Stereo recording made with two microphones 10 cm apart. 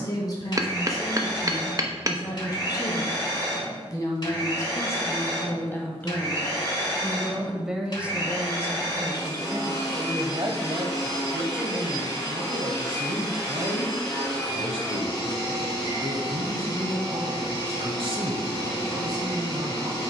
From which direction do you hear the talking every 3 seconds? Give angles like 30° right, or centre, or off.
40° left, 30° left, 10° right, 50° right, 60° right, 60° right, 60° right.